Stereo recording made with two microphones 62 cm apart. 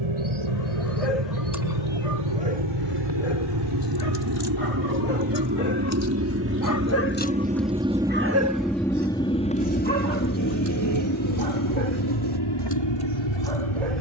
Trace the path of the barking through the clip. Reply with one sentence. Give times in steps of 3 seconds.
You can hear the barking on the left from 0 s, in the centre from 6 s and on the right from 9 s.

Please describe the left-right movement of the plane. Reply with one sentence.
You can hear the plane travel towards the left.